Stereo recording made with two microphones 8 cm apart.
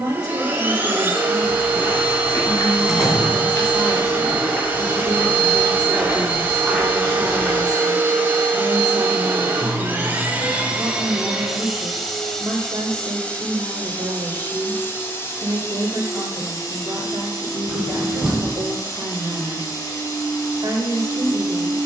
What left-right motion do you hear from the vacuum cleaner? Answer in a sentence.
You can hear the vacuum cleaner move from right to left.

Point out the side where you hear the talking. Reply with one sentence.
In this clip you hear the talking on the right.